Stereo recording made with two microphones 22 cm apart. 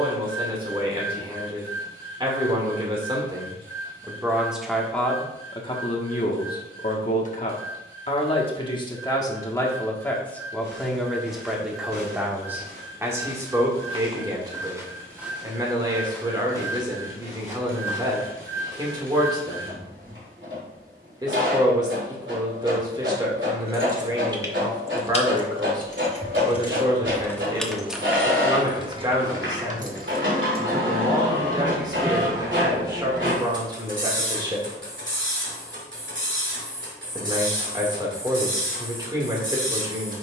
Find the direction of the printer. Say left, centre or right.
right.